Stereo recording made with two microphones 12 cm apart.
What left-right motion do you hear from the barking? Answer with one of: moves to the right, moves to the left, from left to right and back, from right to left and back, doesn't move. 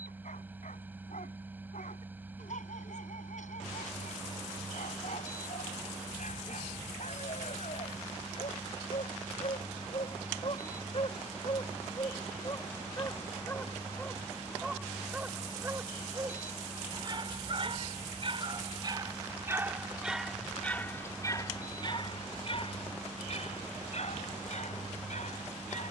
from left to right and back.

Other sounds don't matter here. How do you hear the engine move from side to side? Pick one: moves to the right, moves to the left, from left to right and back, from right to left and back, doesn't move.
doesn't move.